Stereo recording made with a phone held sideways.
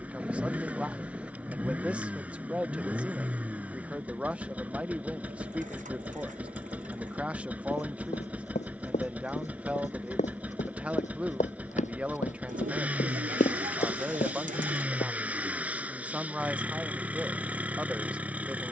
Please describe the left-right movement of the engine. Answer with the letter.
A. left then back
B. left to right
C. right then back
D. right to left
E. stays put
E.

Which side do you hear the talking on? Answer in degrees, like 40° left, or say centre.
10° right.